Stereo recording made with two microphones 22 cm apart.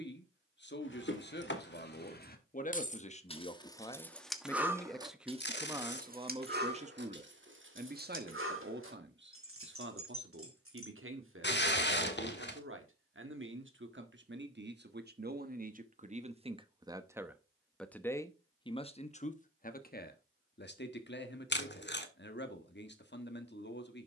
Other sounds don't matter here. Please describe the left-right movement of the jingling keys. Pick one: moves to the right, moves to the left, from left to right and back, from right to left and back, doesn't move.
moves to the right.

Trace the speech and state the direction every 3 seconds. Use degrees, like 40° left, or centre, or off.
40° left, 10° left, 40° right, 60° right, 60° right, 30° right, 30° left, 50° left.